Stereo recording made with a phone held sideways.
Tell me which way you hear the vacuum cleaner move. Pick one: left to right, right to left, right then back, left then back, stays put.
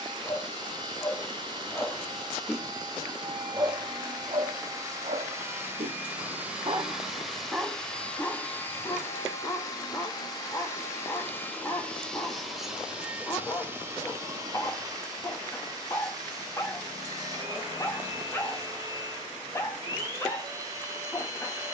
left then back.